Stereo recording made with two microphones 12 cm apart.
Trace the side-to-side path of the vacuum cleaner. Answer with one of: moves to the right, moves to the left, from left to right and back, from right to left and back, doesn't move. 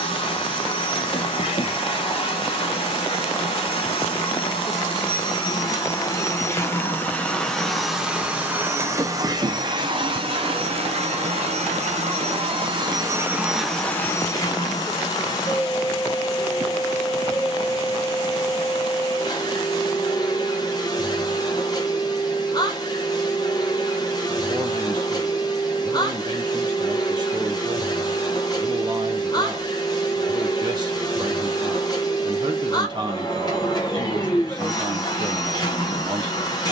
from left to right and back.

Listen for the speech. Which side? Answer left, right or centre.
right.